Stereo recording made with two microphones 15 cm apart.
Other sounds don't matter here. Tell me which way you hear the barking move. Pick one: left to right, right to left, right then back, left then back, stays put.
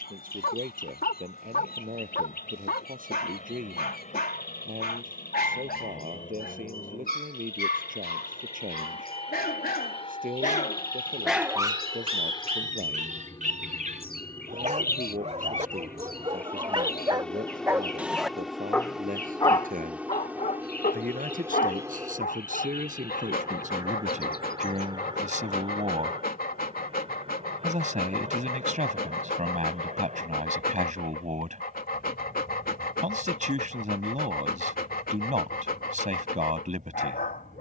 right then back.